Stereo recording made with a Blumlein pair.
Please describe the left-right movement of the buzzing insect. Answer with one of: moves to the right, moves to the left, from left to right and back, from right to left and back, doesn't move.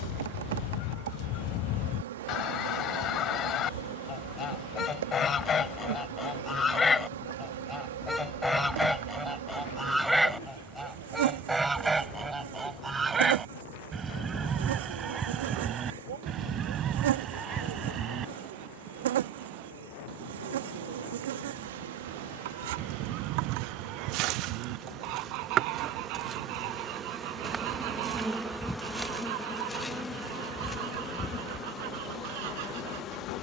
moves to the left.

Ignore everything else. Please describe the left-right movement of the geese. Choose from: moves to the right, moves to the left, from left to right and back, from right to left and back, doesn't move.
moves to the right.